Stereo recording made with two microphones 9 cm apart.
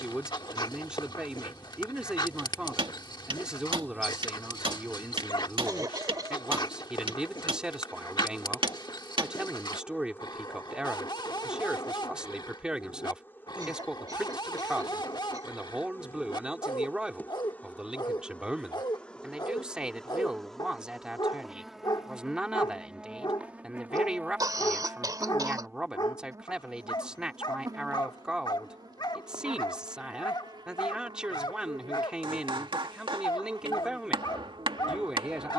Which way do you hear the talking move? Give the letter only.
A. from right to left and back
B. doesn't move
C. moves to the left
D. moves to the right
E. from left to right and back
B.